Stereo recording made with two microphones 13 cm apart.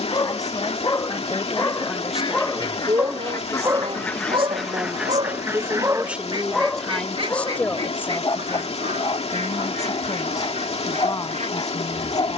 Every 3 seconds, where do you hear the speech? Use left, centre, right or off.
centre, right, centre, left.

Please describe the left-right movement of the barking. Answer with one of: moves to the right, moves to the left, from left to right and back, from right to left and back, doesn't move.
from left to right and back.